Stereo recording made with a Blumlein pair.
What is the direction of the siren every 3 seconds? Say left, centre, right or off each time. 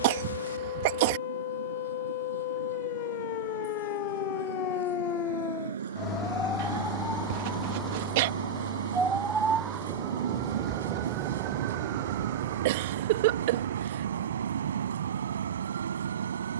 left, left, centre, right, right, right.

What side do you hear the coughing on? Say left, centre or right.
right.